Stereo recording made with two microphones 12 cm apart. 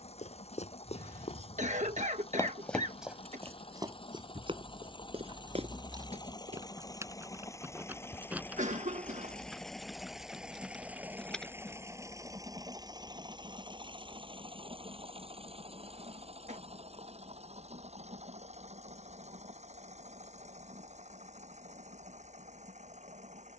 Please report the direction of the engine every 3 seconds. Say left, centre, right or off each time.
left, left, left, centre, right, right, right, right.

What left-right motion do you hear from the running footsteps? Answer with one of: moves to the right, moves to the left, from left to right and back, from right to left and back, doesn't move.
moves to the right.